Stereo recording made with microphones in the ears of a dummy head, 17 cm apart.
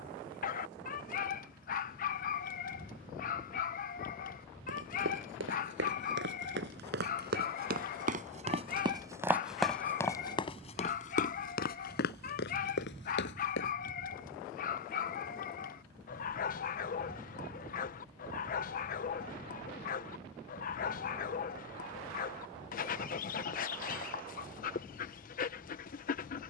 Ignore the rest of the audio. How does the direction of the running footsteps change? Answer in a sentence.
You can hear the running footsteps move from right to left.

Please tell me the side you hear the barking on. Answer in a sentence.
In this clip you hear the barking on the left.